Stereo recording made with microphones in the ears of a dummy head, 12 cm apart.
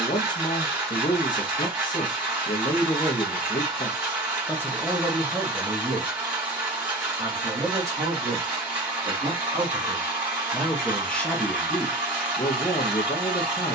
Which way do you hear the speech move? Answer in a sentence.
In this clip you hear the speech move from left to right and back again.